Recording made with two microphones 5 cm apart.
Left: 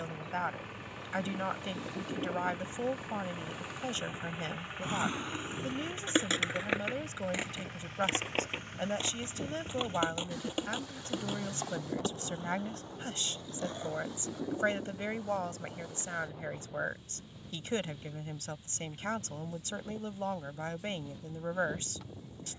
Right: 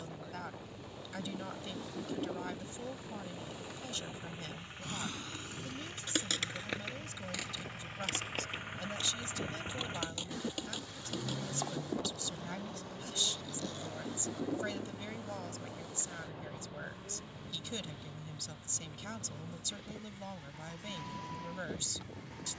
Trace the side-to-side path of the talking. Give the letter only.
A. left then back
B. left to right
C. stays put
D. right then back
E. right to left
C.